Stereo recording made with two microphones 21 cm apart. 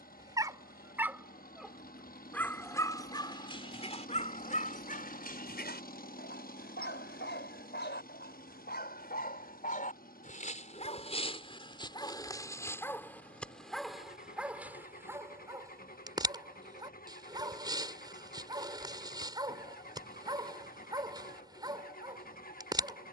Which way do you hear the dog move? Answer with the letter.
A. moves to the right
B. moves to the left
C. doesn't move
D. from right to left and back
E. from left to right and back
D.